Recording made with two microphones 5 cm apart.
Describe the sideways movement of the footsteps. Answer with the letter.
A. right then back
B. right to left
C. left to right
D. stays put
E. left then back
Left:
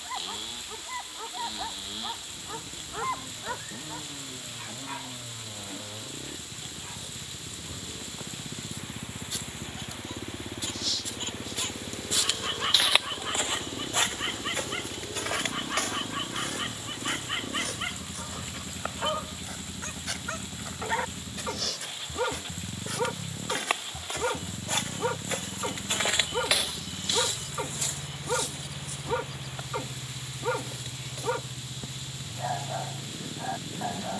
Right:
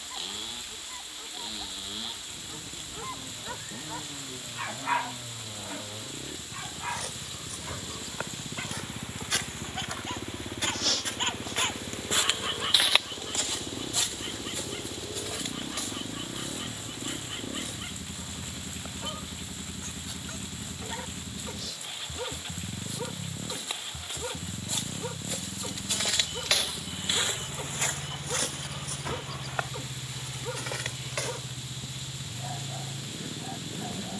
E.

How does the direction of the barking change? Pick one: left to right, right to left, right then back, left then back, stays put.
right then back.